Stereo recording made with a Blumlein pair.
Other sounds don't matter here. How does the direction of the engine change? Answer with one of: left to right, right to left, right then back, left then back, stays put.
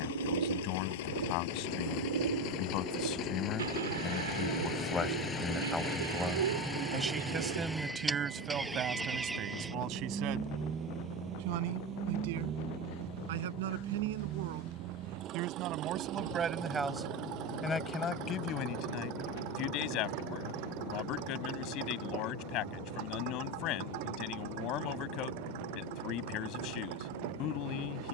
left to right.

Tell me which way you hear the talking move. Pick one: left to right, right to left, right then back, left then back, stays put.
right then back.